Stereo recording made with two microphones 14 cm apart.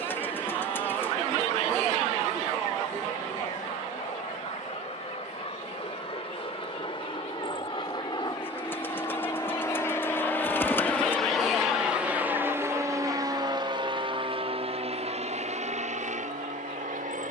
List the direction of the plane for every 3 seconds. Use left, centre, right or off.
left, left, left, centre, right, right.